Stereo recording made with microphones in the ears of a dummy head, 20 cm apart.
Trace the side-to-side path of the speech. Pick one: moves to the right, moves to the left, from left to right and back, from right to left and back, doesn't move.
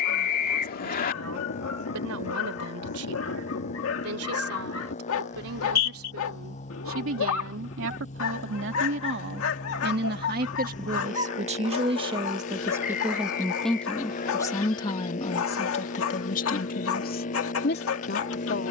moves to the left.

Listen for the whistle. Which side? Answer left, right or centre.
left.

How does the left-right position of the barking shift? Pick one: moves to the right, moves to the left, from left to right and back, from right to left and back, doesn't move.
doesn't move.